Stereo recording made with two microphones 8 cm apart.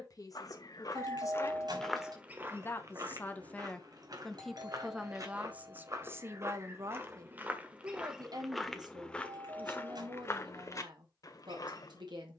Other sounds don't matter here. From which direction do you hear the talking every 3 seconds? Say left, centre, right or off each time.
left, centre, right, right.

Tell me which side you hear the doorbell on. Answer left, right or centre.
right.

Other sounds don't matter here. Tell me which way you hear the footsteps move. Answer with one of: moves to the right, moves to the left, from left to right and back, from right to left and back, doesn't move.
from left to right and back.